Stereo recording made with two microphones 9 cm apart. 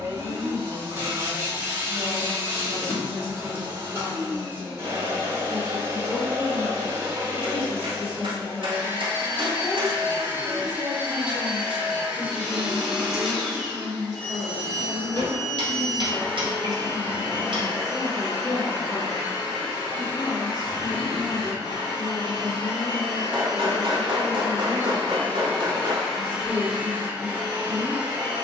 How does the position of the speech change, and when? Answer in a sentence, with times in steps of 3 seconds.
In this clip you hear the speech on the left from 0 s, in the centre from 9 s, on the right from 12 s, in the centre from 15 s and on the left from 18 s.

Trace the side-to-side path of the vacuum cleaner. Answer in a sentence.
You can hear the vacuum cleaner go left and come back.